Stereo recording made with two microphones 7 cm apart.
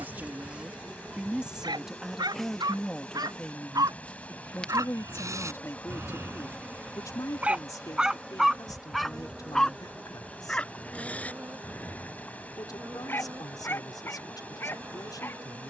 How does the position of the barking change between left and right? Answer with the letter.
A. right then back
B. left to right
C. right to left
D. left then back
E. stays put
C.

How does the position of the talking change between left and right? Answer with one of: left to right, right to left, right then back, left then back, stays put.
right to left.